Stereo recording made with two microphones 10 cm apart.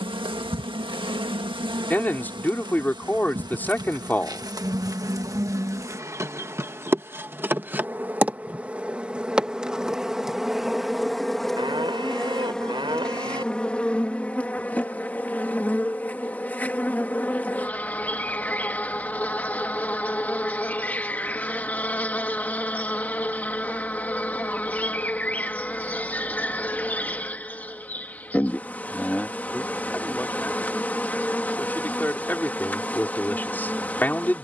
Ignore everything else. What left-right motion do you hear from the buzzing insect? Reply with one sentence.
In this clip you hear the buzzing insect move from right to left.